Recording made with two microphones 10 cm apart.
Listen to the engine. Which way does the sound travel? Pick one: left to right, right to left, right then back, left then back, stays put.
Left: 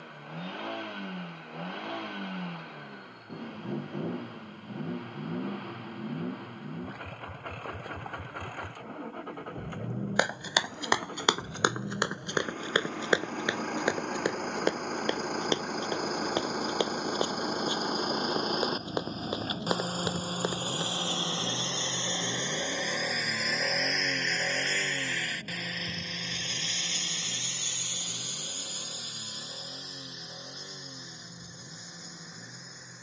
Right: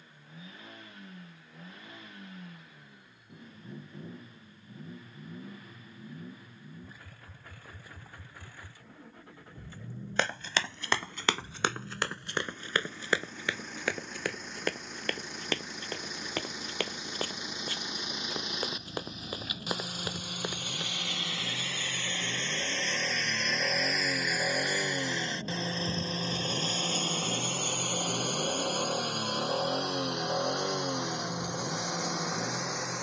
left to right.